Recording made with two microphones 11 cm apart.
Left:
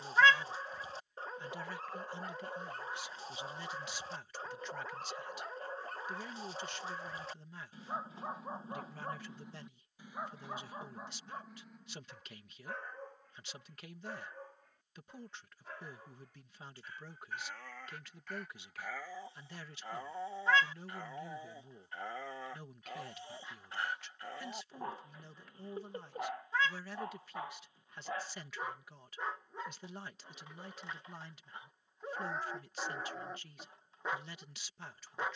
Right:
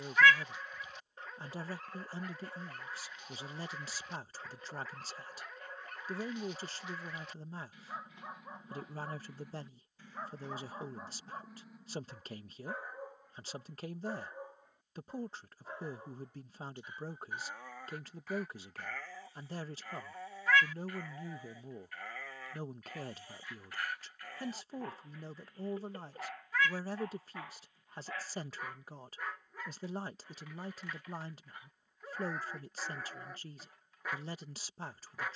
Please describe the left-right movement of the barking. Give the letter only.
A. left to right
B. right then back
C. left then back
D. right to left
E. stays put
B.